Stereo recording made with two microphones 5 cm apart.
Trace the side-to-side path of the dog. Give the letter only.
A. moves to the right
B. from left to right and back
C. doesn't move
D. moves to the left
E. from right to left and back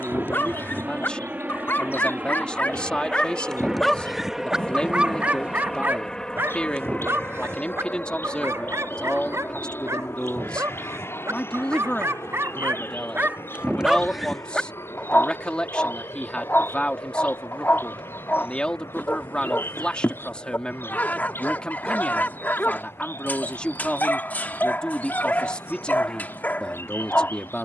B.